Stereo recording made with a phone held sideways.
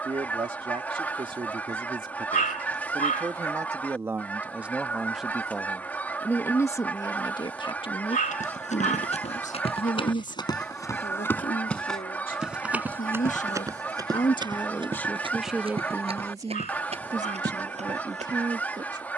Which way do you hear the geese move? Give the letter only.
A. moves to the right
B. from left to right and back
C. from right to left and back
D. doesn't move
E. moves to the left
D.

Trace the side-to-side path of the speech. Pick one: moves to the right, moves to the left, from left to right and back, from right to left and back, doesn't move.
from right to left and back.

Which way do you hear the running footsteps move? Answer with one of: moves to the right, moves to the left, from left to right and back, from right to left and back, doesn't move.
moves to the right.